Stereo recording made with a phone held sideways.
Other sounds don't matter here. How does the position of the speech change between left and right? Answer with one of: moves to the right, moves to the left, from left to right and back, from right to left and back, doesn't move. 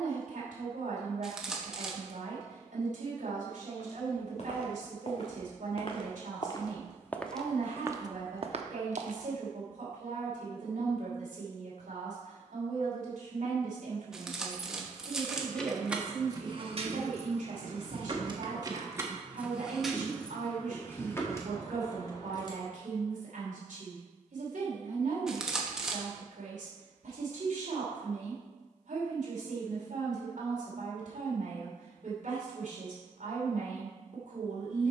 doesn't move.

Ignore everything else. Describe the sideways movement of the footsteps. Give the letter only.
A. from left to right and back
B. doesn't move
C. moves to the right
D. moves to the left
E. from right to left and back
C.